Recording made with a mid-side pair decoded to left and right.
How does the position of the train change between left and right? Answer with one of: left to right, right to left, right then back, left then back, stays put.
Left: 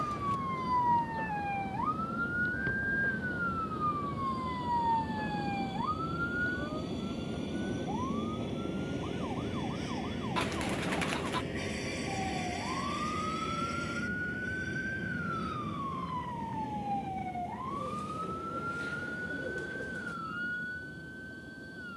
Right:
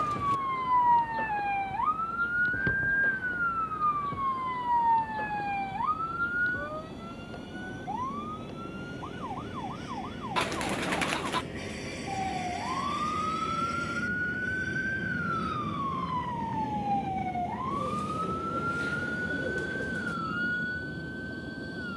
left to right.